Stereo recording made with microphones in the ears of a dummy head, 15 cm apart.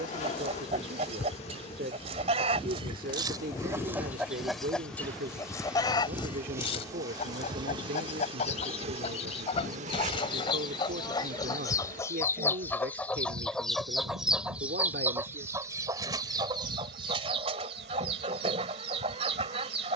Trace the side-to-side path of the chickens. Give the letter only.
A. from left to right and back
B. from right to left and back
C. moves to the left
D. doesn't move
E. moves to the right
B.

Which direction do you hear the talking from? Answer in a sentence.
You can hear the talking on the right.